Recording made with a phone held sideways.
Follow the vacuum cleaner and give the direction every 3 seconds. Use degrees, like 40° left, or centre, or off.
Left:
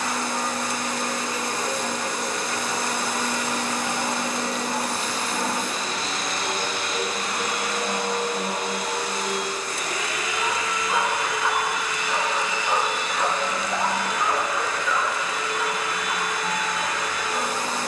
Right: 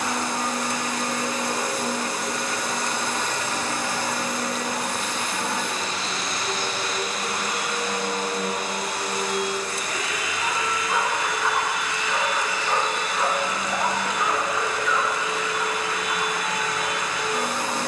10° right, 30° left, 60° left, 70° left, centre, 20° right.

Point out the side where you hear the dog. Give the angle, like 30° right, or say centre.
10° left.